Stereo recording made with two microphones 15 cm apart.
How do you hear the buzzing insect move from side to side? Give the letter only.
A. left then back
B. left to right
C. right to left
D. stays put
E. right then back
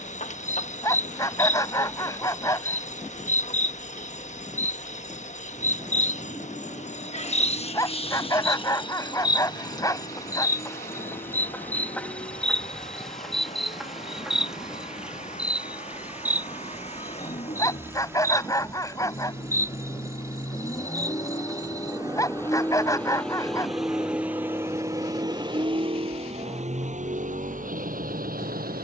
B.